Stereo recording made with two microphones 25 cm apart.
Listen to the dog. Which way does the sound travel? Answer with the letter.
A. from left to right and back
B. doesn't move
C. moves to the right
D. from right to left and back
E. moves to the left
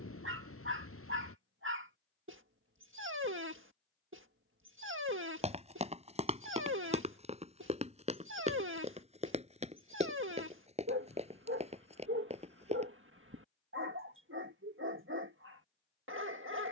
B.